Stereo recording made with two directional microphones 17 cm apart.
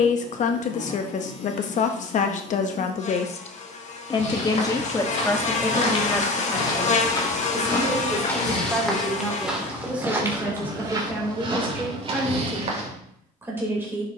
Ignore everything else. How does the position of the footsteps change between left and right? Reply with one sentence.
In this clip you hear the footsteps travel towards the right.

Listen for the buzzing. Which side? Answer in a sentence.
You can hear the buzzing on the left.